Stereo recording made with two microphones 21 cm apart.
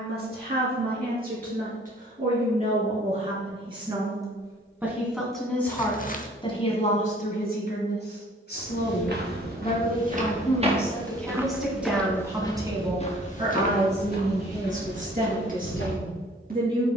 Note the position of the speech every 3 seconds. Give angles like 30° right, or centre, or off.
40° right, 10° right, 40° left, 10° left, 30° right, 40° right.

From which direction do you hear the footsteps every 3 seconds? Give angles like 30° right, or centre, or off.
off, off, 50° right, 30° right, 40° left, 60° left.